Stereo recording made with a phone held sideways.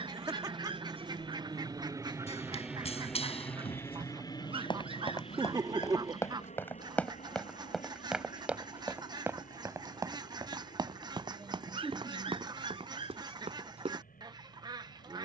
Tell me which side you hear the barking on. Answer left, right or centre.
right.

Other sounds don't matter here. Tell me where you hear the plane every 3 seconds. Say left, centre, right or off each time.
right, left, left, left, left.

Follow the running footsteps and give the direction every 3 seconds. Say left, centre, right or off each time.
left, left, centre, right, right.